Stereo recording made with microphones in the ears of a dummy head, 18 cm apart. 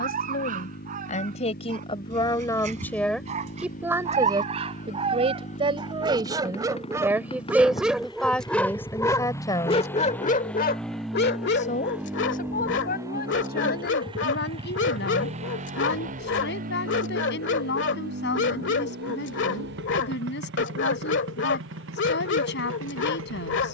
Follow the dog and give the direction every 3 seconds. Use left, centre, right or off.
right, right, centre, left, left, left, left, left.